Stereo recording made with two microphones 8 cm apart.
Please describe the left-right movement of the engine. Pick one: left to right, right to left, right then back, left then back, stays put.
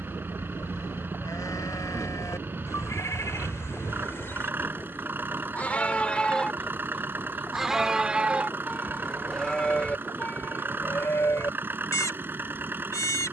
stays put.